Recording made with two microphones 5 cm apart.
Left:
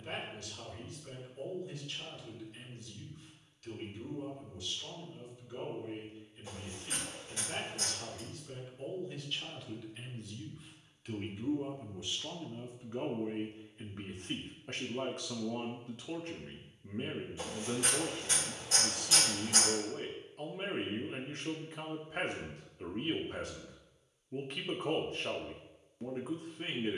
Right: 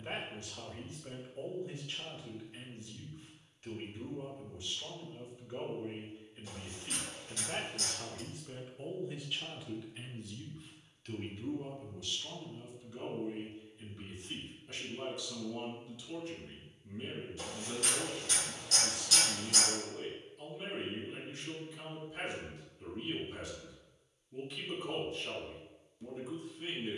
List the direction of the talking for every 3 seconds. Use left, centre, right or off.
right, right, right, centre, left, left, left, left, left.